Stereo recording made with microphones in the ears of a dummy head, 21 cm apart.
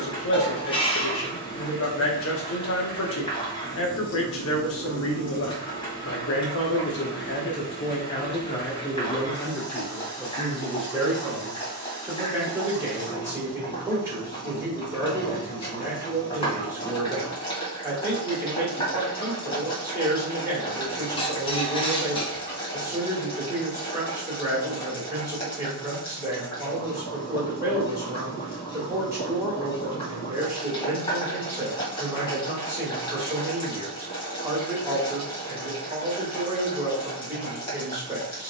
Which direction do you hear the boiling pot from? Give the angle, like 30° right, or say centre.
20° left.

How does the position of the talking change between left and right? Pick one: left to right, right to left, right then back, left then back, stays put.
left to right.